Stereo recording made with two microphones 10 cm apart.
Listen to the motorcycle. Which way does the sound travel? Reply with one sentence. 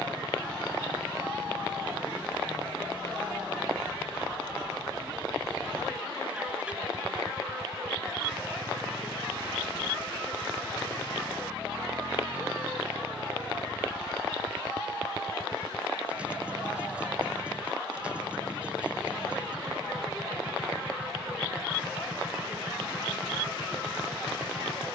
You can hear the motorcycle stay in one place.